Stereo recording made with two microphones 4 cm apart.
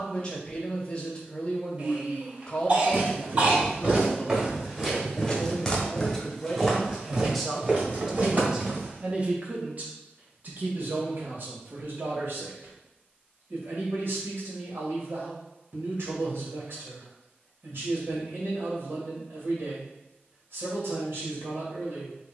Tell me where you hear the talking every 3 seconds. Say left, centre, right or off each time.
left, left, centre, right, right, right, right, right.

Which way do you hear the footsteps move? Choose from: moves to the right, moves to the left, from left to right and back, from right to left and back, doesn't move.
from right to left and back.